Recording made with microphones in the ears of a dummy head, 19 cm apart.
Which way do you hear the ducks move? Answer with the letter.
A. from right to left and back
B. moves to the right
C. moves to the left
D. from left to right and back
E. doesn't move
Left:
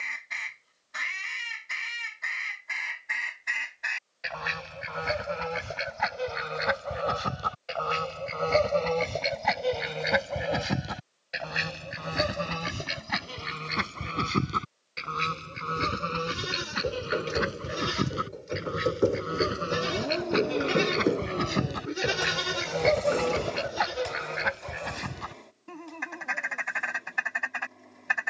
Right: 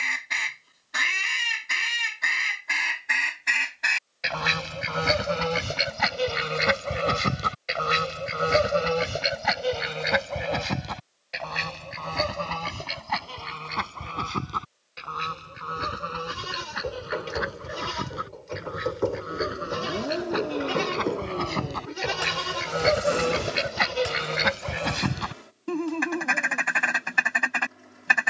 A.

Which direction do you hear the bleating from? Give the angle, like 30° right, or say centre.
20° left.